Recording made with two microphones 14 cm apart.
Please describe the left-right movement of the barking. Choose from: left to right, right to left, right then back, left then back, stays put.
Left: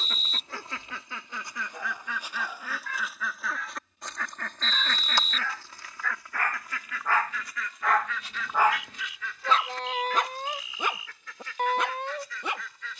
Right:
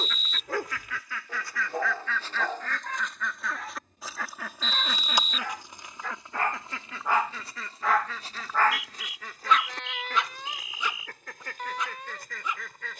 right to left.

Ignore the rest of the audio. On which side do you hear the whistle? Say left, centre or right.
left.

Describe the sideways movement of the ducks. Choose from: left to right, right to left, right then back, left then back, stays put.
left to right.